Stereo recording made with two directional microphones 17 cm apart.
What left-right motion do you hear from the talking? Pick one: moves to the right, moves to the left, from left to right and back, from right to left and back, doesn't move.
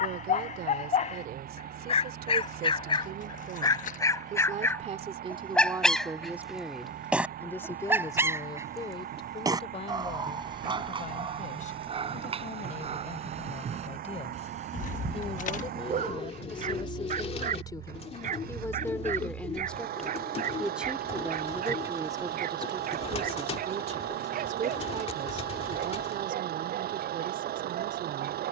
from right to left and back.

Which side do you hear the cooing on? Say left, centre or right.
left.